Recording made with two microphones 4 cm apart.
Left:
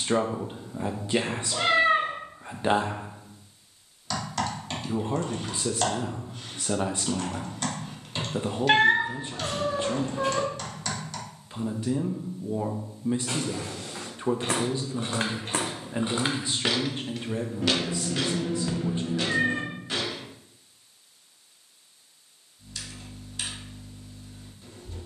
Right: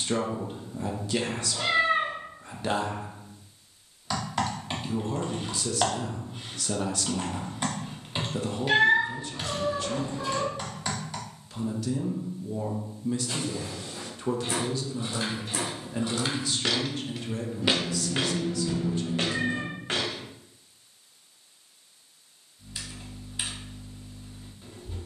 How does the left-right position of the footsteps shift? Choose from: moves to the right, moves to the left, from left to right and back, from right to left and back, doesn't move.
moves to the right.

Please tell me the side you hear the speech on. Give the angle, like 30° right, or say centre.
20° left.